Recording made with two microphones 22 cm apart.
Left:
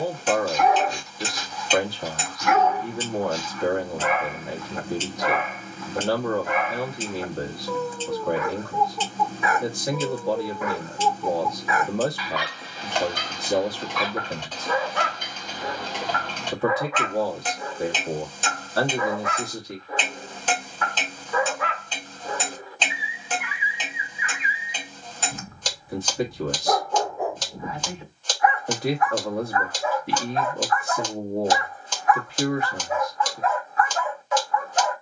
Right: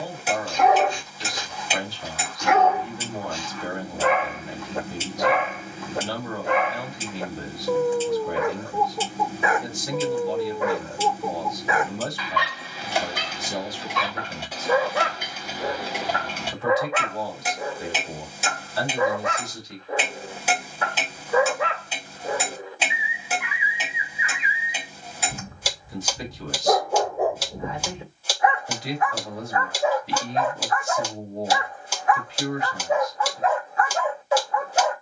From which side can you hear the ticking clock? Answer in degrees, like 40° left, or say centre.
10° right.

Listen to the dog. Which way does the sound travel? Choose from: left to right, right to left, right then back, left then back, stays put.
stays put.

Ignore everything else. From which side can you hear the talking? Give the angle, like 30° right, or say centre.
60° left.